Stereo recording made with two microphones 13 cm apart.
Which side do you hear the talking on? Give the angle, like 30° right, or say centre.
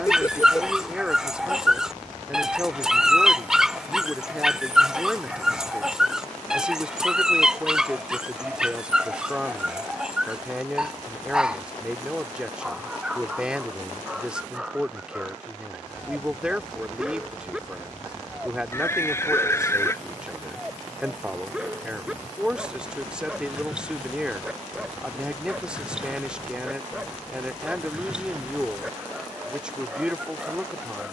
10° right.